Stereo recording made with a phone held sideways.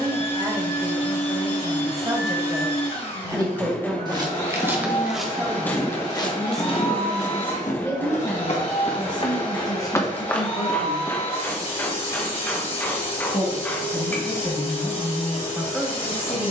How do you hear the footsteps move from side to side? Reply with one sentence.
You can hear the footsteps go left and come back.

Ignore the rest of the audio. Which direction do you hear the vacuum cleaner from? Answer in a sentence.
You can hear the vacuum cleaner on the left.